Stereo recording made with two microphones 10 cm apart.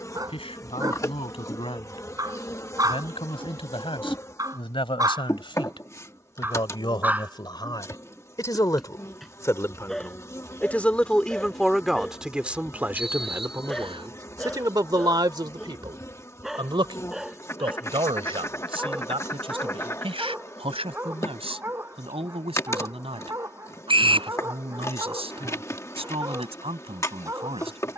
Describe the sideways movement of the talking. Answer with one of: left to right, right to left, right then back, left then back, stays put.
left to right.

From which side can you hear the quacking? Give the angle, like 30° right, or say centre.
30° left.